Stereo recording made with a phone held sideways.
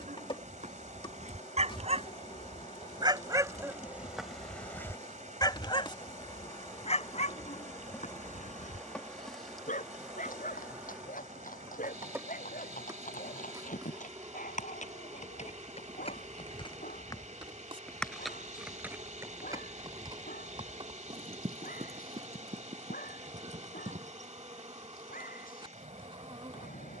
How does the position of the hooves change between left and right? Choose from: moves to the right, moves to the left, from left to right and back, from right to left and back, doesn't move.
moves to the right.